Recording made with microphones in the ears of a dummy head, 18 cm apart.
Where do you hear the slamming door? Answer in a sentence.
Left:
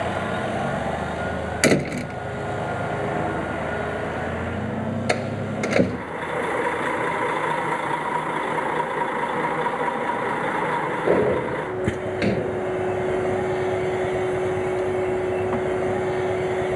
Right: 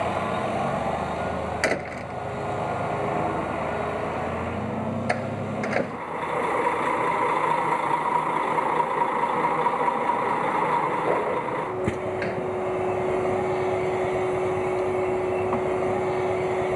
In this clip you hear the slamming door on the left.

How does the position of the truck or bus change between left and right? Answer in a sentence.
In this clip you hear the truck or bus stay put.